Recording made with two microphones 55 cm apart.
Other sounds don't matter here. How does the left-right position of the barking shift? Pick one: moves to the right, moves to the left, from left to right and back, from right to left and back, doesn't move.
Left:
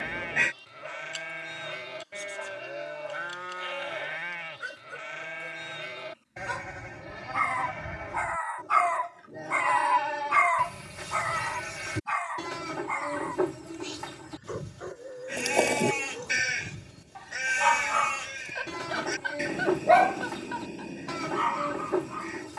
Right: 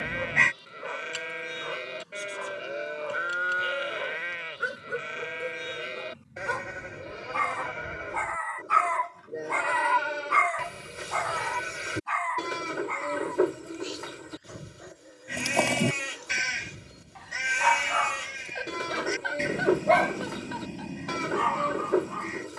from right to left and back.